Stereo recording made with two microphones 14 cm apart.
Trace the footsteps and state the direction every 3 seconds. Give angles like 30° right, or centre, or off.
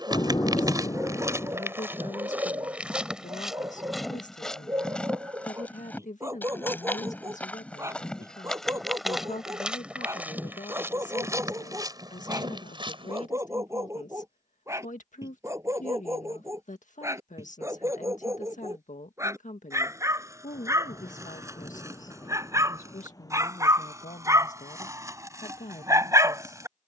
20° right, centre, 10° left, 10° right, 30° right, off, off, off, off.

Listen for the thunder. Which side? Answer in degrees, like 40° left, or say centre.
30° left.